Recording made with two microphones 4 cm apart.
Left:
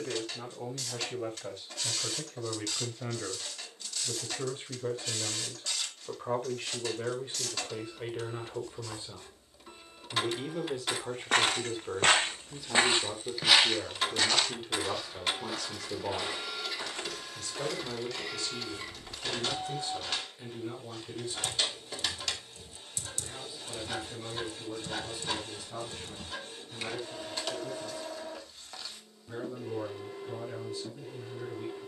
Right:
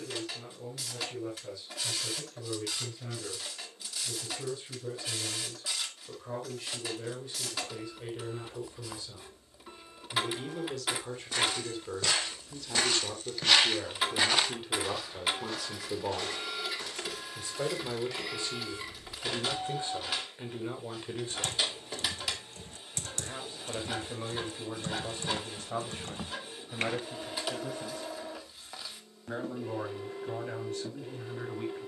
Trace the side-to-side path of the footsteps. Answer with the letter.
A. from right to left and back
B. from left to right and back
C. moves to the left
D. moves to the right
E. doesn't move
B.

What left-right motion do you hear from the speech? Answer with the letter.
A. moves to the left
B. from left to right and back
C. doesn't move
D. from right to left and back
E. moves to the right
E.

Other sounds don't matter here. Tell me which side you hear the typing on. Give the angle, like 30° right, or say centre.
50° right.